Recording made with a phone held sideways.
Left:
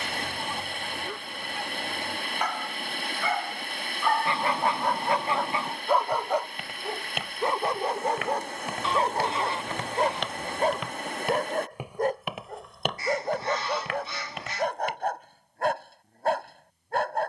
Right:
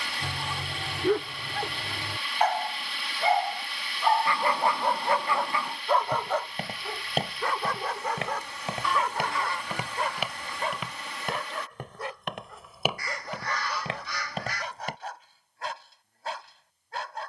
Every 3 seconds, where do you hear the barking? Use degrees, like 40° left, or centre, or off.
60° right, 10° right, 20° left, 40° left, 50° left, 50° left.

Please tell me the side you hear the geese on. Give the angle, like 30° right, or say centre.
20° left.